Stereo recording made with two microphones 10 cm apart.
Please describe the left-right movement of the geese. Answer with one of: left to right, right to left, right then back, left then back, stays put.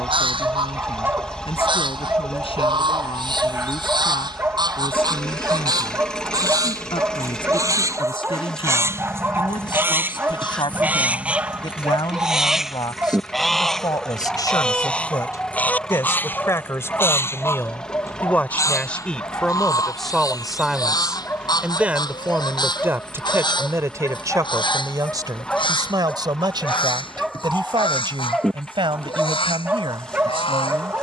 right to left.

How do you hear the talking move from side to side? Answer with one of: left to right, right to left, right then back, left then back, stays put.
left to right.